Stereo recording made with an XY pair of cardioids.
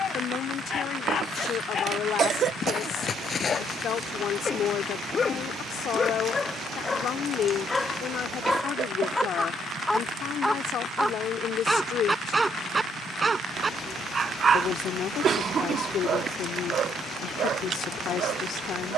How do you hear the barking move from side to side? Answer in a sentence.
In this clip you hear the barking move to the right.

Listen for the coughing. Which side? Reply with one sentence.
In this clip you hear the coughing on the right.